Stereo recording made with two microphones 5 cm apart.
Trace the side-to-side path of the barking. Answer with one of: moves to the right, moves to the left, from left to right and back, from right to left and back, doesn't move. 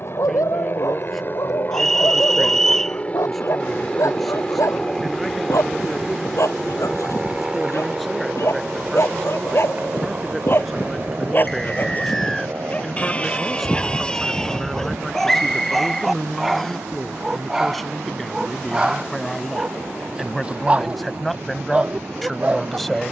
moves to the right.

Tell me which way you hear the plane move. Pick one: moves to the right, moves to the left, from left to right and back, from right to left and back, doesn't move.
moves to the right.